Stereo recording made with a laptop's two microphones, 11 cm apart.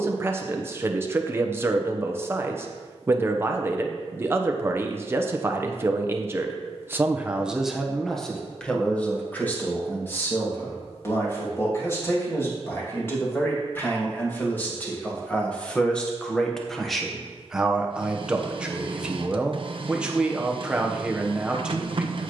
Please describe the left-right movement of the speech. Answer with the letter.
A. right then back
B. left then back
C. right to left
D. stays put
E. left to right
B.